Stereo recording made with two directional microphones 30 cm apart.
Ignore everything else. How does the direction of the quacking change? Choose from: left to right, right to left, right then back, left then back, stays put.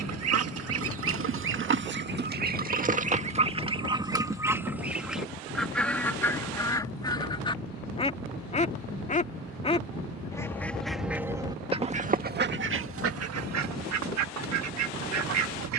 left then back.